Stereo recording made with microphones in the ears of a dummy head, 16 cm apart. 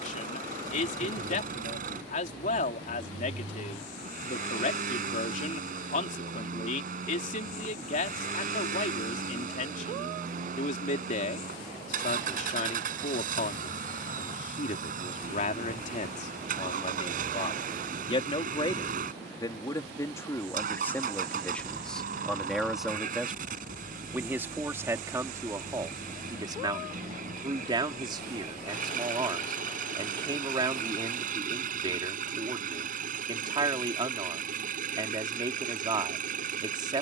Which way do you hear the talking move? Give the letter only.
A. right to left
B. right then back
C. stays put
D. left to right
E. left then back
D.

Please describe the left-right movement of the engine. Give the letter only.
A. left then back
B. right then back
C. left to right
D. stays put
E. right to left
D.